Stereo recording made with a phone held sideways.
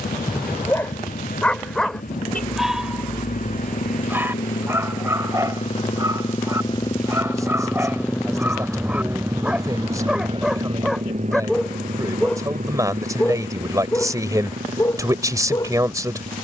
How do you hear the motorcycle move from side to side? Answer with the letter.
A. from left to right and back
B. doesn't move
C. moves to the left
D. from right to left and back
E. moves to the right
E.